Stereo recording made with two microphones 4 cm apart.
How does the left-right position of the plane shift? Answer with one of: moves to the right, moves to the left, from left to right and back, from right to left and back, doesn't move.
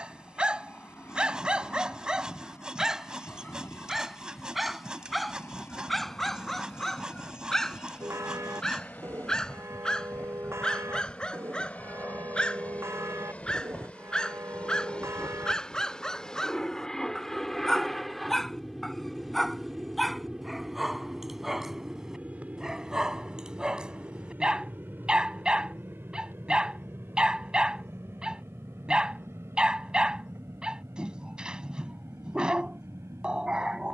moves to the right.